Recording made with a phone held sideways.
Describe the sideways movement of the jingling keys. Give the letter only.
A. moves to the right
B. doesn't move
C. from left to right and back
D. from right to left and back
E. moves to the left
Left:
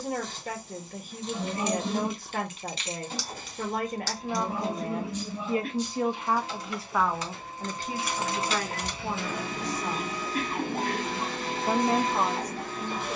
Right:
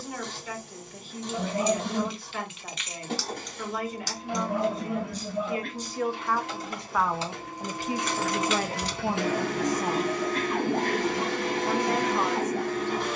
C.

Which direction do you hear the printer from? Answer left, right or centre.
right.